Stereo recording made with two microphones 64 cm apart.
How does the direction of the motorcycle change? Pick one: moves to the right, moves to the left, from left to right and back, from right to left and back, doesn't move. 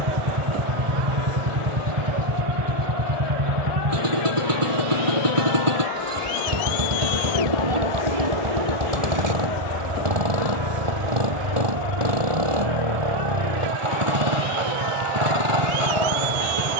doesn't move.